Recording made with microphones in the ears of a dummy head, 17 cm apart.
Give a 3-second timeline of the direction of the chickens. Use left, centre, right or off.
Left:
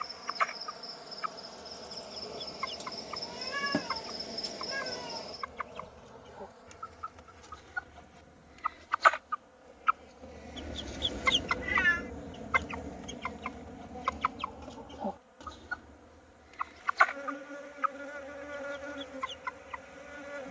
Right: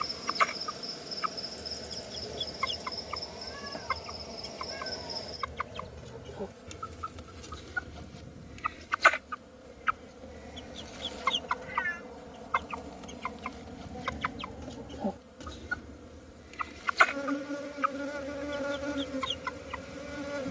right, right, right, centre, centre, right, right.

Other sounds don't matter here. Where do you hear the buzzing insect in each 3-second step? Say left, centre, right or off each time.
right, centre, right, right, right, right, right.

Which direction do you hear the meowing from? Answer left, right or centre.
left.